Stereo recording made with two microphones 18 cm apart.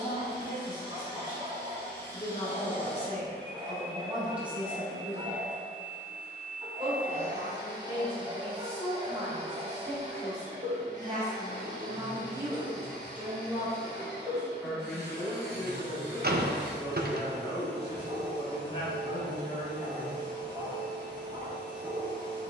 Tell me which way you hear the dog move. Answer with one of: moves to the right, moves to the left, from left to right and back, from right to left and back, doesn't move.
doesn't move.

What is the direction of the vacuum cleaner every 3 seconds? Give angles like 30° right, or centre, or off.
20° left, centre, 20° right, 40° right, 60° right, 70° right, 80° right, 80° right.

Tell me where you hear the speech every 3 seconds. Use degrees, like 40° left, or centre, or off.
40° left, centre, 30° right, 20° right, 10° right, 20° left, 40° left, off.